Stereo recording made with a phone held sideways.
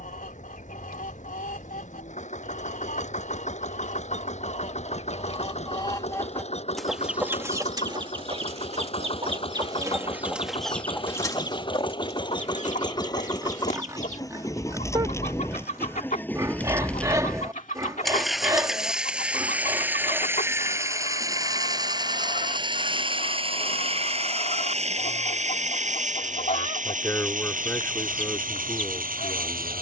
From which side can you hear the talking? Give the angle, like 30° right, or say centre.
20° left.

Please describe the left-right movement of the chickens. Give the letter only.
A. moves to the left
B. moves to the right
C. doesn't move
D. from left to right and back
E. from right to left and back
D.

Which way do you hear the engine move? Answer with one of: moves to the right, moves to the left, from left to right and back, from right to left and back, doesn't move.
moves to the right.